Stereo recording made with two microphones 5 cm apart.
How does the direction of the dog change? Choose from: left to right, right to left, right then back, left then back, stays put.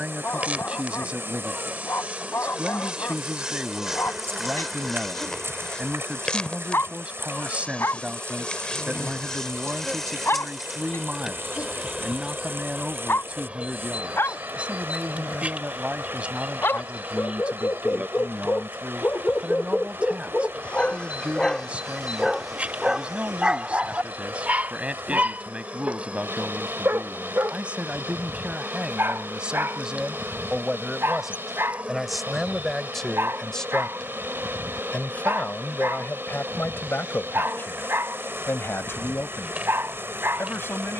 left to right.